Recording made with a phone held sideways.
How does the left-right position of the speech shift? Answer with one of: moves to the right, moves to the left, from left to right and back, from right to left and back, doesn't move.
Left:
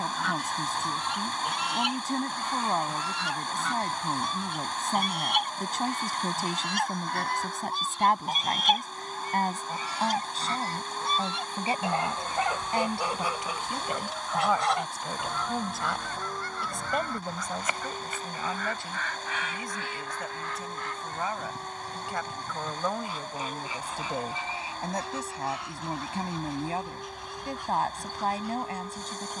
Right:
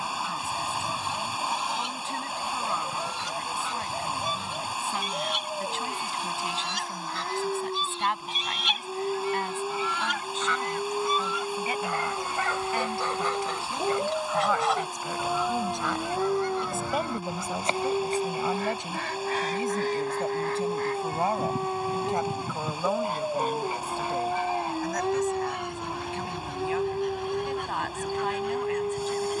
from left to right and back.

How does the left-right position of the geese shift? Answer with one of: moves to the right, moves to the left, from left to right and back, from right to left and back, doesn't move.
moves to the right.